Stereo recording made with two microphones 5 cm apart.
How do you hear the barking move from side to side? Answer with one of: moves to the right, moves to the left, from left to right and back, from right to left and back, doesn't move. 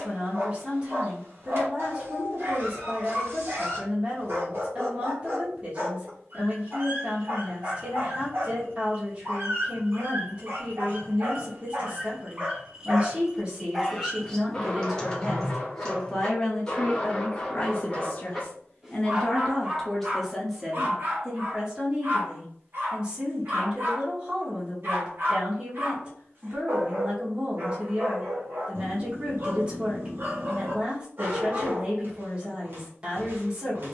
from right to left and back.